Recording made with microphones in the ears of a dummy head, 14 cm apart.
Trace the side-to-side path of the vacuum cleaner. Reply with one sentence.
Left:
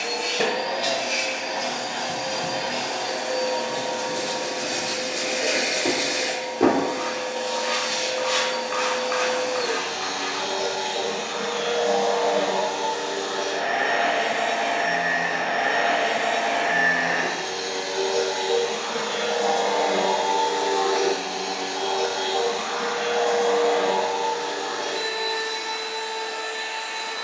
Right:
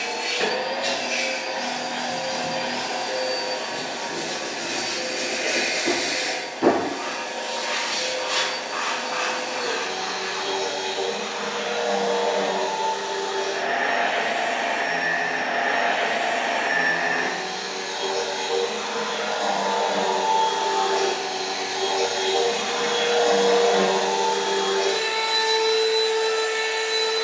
In this clip you hear the vacuum cleaner move to the right.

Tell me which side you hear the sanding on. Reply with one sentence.
You can hear the sanding on the left.